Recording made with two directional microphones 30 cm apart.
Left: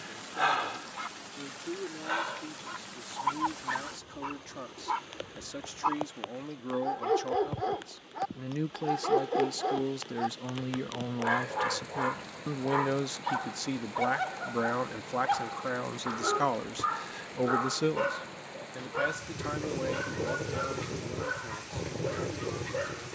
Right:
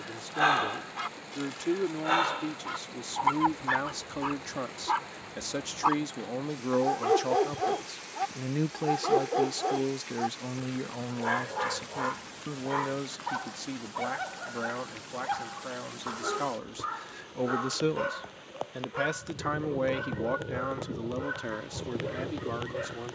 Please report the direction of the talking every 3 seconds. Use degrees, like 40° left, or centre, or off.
60° right, 50° right, 30° right, centre, 30° left, 20° left, 40° right, 60° right.